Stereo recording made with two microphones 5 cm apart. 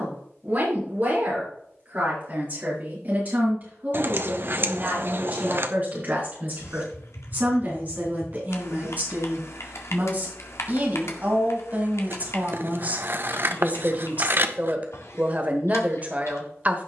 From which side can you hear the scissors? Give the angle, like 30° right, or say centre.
50° right.